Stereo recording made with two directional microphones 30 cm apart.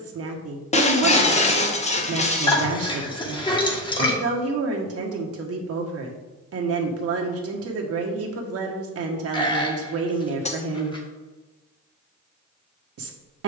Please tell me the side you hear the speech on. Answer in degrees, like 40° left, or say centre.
50° right.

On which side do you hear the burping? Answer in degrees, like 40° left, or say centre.
20° left.